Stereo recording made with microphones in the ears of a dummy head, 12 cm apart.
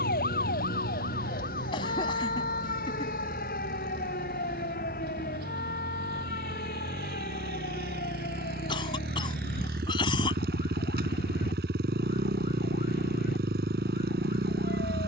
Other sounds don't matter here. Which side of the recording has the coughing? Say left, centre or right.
left.